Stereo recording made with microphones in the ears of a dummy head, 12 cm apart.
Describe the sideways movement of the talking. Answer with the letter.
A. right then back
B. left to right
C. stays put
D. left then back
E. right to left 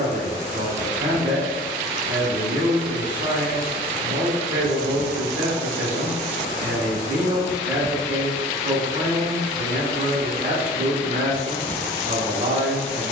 C.